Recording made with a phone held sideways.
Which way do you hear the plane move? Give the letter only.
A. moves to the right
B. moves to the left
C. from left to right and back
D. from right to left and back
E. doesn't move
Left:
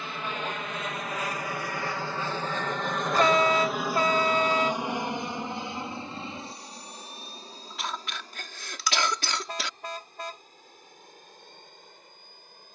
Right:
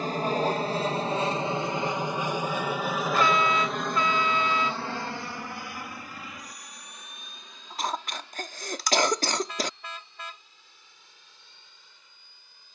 B.